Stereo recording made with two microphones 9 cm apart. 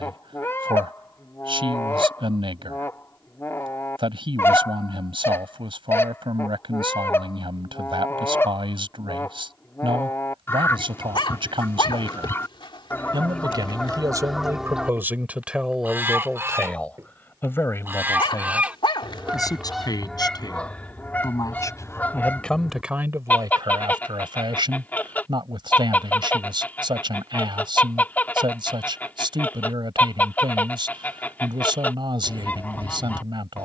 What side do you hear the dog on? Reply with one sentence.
You can hear the dog on the left.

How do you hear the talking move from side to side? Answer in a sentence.
In this clip you hear the talking go left and come back.